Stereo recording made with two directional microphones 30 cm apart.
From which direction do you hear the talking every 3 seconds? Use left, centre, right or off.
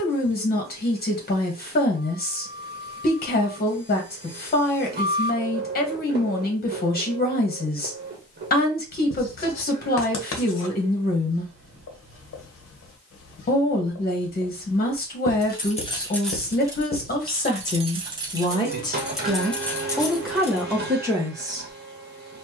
left, left, left, left, left, left, centre, centre.